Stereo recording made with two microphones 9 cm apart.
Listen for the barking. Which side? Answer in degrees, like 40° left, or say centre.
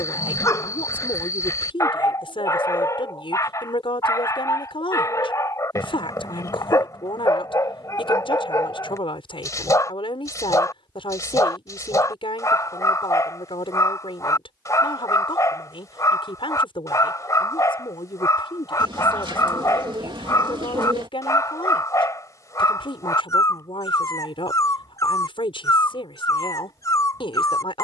40° left.